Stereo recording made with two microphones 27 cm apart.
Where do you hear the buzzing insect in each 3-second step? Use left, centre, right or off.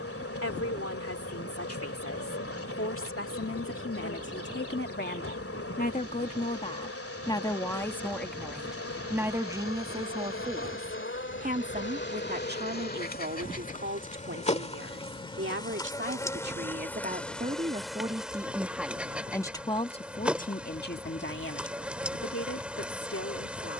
left, left, left, left, left, centre, centre, centre.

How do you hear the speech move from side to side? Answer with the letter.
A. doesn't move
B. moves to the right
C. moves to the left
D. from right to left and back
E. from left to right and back
E.